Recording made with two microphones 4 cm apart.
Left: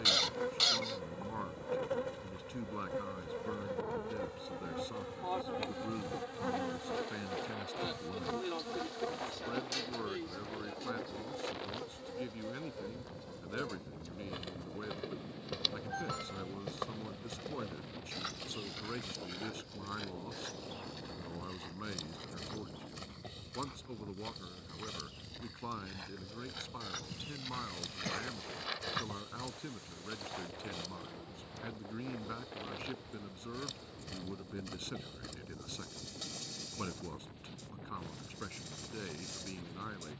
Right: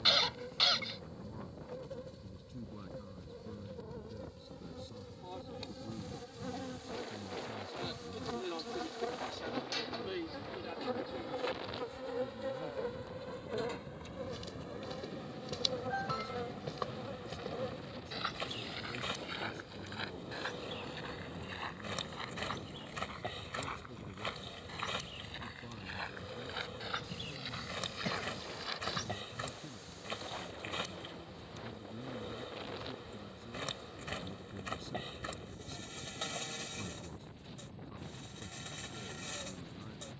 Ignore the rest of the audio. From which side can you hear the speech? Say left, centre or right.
left.